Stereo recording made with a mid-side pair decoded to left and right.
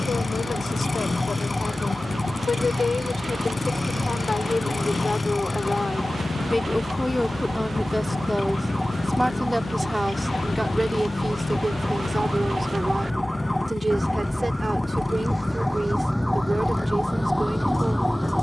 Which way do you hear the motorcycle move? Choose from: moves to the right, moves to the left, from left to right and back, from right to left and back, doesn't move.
doesn't move.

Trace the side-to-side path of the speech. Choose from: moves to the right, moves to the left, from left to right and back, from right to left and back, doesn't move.
moves to the right.